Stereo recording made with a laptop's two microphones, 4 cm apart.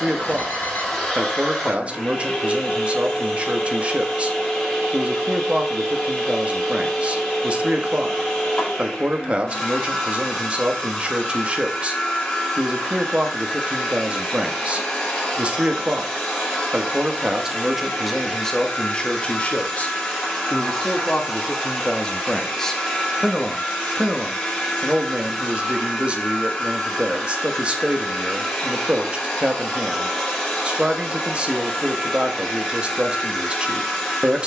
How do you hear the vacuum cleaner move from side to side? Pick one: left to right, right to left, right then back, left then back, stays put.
stays put.